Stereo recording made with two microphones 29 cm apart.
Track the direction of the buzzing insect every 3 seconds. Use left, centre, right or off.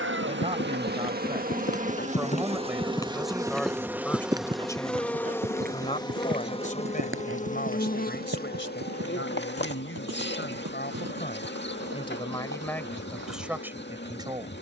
right, centre, left, left, left.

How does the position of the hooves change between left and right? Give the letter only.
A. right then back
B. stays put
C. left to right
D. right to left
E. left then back
C.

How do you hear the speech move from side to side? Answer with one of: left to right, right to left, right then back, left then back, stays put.
left then back.